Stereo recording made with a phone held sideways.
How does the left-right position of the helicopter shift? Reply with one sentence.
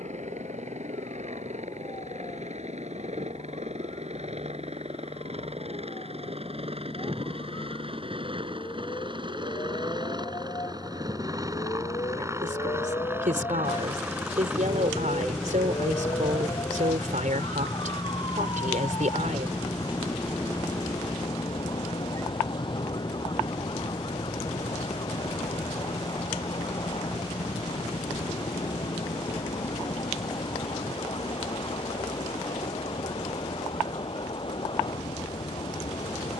In this clip you hear the helicopter move to the left.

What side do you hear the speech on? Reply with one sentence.
You can hear the speech on the right.